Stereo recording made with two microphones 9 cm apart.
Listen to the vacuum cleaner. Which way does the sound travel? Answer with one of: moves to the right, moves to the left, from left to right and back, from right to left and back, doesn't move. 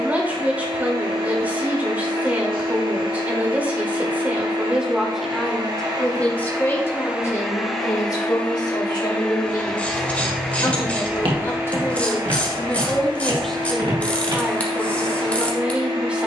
from right to left and back.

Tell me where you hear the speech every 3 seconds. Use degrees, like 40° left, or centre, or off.
20° right, 10° right, 40° left, 40° left, centre, 10° right.